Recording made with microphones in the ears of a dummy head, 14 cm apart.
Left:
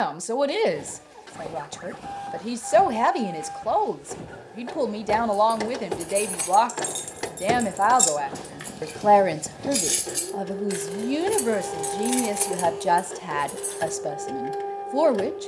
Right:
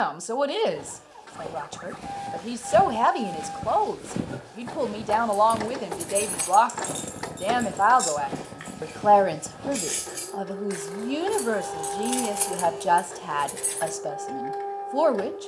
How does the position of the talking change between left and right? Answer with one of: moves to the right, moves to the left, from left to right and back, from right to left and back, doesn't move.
doesn't move.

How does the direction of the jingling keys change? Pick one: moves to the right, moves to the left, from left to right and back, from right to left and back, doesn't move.
from right to left and back.